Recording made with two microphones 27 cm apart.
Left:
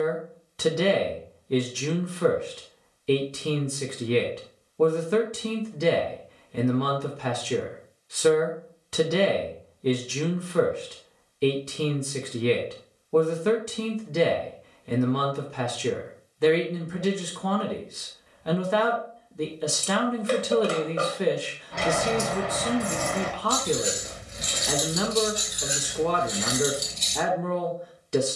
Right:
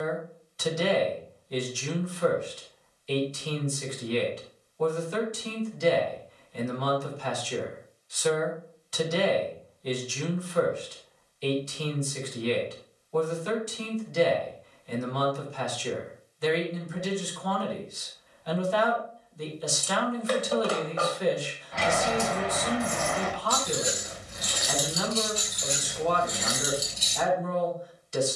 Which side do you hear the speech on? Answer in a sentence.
In this clip you hear the speech on the left.